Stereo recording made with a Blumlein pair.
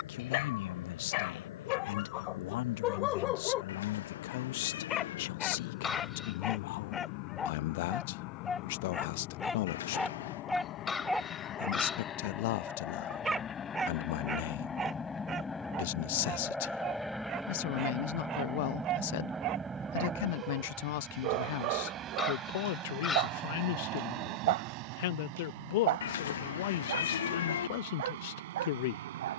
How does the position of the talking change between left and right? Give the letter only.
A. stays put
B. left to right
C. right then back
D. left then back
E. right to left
A.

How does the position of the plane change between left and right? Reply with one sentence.
You can hear the plane move to the right.